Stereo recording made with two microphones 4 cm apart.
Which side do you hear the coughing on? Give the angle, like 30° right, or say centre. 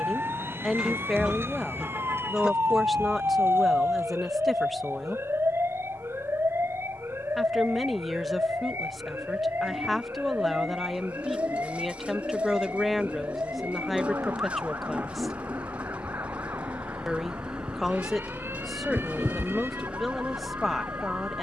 20° right.